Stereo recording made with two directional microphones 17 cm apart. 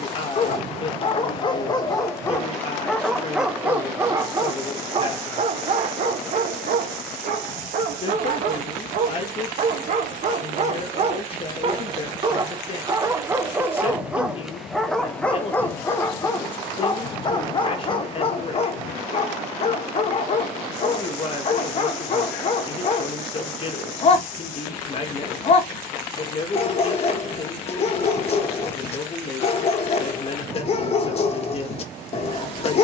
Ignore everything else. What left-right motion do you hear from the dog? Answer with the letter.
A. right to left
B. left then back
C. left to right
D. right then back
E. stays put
D.